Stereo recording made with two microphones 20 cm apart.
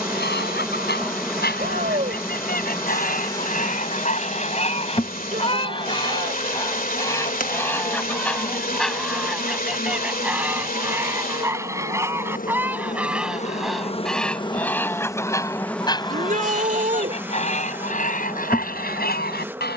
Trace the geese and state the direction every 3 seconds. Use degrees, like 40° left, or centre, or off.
50° left, 40° left, 10° left, 10° right, centre, 30° left, 50° left.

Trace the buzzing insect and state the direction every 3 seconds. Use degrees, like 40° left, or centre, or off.
centre, 30° left, 40° left, 50° left, 30° left, centre, 10° right.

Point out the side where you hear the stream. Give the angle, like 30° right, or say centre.
50° left.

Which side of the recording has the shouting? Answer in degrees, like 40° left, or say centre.
40° right.